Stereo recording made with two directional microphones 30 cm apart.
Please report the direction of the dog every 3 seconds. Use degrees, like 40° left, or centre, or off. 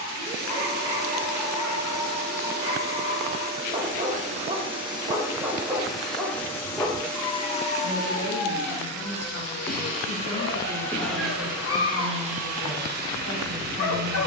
20° right, 20° right, 30° left, 50° left, 50° left.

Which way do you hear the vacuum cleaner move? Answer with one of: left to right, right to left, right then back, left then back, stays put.
left then back.